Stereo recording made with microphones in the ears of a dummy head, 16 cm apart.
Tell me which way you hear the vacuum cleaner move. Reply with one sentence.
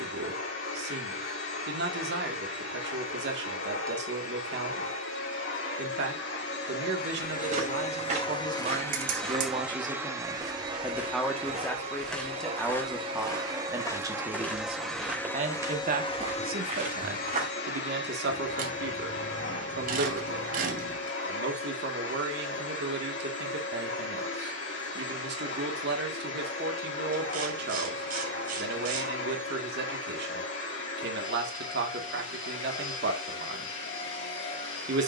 You can hear the vacuum cleaner go right and come back.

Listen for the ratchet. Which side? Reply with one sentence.
In this clip you hear the ratchet on the right.